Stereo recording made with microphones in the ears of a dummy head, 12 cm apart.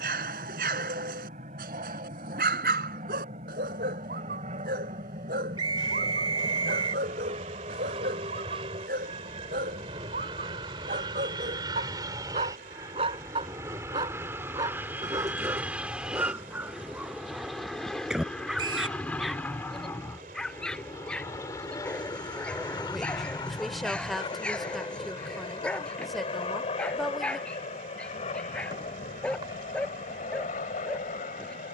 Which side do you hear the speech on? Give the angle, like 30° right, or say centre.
centre.